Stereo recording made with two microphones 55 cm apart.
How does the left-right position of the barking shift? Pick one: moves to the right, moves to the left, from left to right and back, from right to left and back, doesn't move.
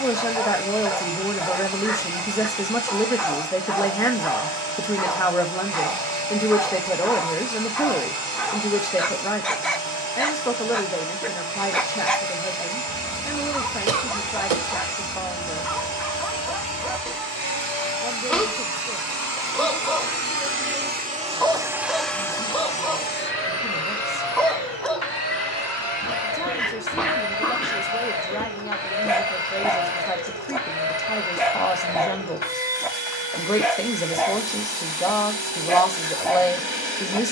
doesn't move.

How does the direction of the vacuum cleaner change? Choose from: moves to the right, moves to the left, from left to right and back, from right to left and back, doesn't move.
moves to the left.